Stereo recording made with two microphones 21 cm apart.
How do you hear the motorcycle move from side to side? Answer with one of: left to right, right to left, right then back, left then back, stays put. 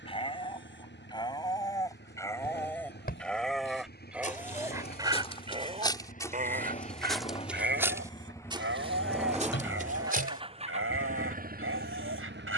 left to right.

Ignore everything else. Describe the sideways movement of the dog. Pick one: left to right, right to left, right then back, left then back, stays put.
left to right.